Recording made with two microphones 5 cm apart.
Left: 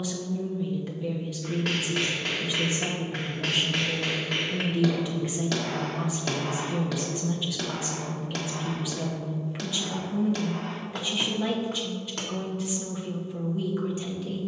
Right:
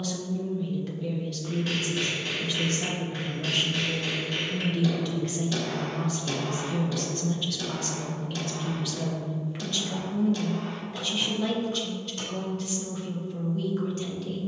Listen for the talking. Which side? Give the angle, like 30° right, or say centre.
10° left.